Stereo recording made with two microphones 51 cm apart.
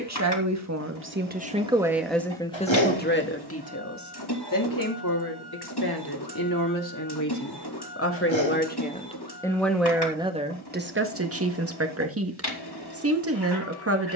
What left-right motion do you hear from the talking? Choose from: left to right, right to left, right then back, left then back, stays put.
left then back.